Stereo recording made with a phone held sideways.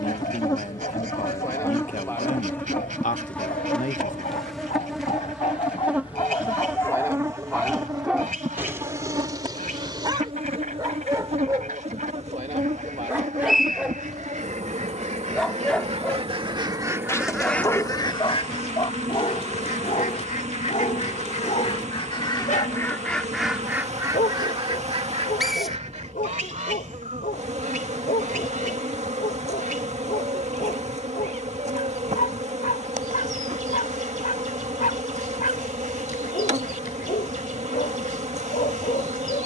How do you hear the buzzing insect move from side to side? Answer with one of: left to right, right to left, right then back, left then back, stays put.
left to right.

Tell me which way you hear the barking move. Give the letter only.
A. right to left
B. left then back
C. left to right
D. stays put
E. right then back
E.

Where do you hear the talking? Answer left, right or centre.
left.